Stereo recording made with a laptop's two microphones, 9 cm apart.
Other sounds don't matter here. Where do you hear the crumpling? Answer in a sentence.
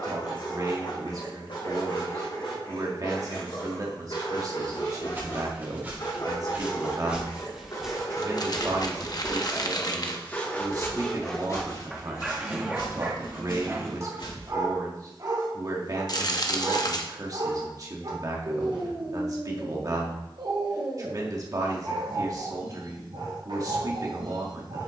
In this clip you hear the crumpling on the left.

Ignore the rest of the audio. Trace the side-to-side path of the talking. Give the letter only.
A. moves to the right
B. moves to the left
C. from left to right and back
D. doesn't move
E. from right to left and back
D.